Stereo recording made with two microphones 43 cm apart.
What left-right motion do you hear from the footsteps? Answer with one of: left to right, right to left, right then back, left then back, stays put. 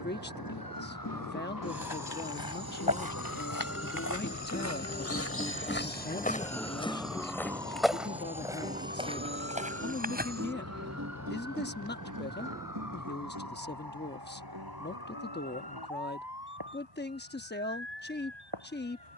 left to right.